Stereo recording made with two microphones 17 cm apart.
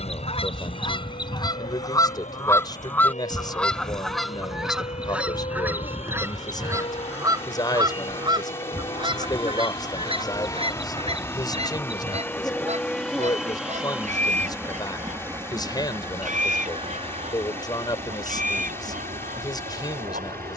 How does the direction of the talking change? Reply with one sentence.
You can hear the talking stay in one place.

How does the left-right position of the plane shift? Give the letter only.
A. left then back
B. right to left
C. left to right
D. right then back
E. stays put
C.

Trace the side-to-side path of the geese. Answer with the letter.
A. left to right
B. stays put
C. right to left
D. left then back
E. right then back
A.